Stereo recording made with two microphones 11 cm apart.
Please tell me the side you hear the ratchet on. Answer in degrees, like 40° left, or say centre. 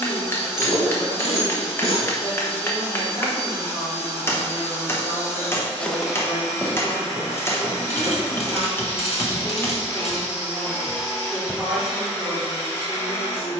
60° left.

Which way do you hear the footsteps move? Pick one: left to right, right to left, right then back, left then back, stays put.
right then back.